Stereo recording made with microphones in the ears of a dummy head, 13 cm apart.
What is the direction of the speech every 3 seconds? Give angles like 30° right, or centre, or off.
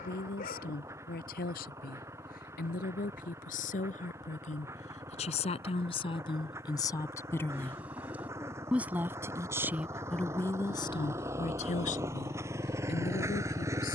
70° left, 50° left, 20° left, 20° left, 60° left.